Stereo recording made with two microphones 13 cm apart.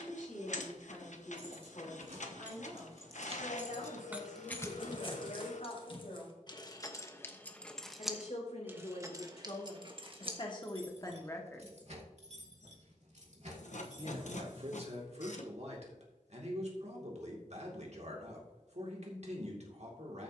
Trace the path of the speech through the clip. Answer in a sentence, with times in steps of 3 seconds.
You can hear the speech on the left from 0 s and on the right from 12 s.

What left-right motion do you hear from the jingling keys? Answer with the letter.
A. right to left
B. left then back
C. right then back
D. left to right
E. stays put
B.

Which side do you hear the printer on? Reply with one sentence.
In this clip you hear the printer on the left.